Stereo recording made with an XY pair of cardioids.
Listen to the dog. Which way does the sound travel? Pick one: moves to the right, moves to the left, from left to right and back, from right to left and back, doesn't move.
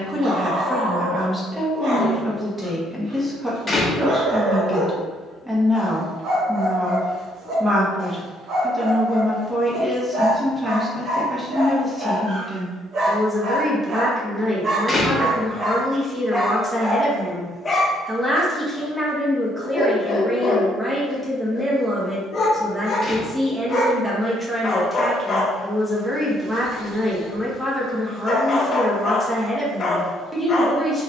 moves to the left.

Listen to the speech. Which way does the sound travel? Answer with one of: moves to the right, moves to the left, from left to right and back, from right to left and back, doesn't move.
doesn't move.